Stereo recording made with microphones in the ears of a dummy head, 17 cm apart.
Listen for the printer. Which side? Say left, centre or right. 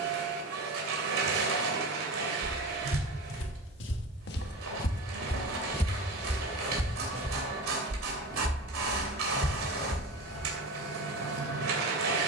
right.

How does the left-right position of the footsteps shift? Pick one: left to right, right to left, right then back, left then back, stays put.
left to right.